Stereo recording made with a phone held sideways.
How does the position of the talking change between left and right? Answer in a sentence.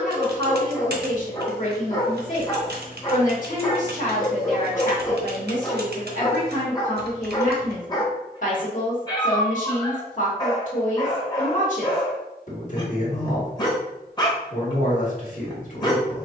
You can hear the talking stay put.